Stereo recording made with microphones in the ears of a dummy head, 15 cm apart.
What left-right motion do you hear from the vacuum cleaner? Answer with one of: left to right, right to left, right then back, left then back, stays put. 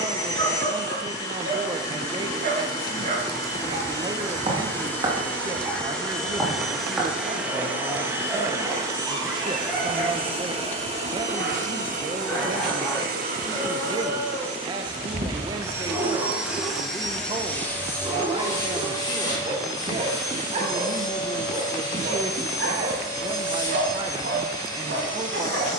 right then back.